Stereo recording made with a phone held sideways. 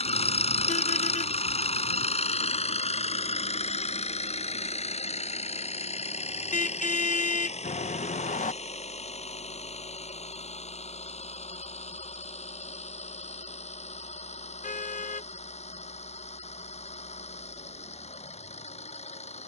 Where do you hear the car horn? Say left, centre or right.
left.